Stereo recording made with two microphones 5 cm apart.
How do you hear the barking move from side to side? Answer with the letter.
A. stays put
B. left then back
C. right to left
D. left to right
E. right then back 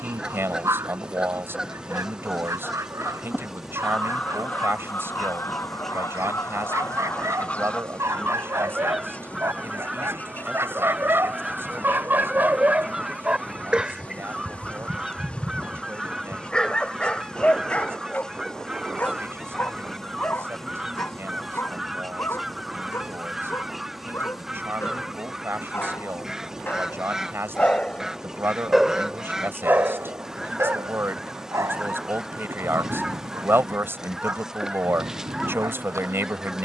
B.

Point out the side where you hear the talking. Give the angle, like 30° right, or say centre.
50° right.